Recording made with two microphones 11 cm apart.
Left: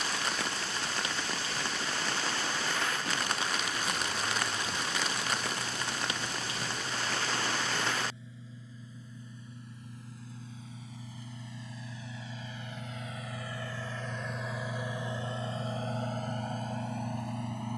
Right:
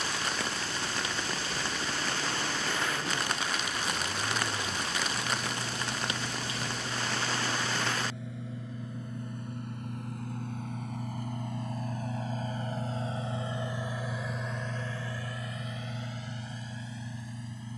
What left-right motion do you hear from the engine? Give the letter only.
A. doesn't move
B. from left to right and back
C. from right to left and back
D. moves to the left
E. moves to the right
D.